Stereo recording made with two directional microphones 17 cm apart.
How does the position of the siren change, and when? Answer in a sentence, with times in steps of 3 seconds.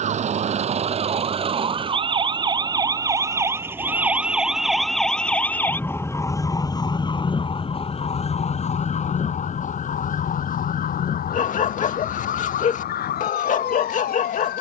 You can hear the siren on the right from 0 s, in the centre from 3 s and on the left from 6 s.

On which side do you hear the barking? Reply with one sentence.
In this clip you hear the barking on the left.